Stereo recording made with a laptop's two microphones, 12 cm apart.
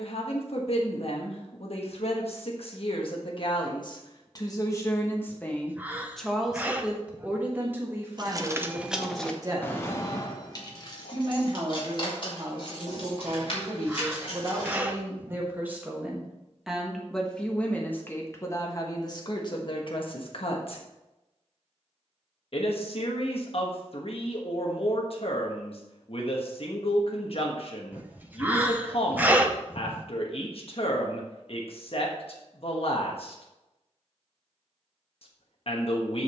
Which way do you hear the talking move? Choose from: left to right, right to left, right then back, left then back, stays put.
right then back.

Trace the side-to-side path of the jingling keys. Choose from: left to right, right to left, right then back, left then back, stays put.
right to left.